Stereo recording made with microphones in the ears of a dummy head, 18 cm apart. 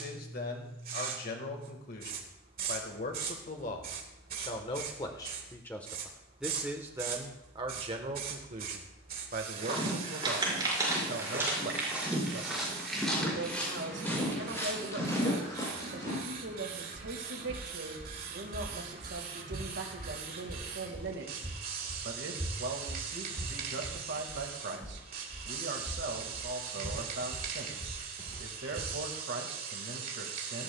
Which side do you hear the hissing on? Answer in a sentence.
You can hear the hissing on the right.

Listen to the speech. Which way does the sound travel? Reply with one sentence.
In this clip you hear the speech move from left to right.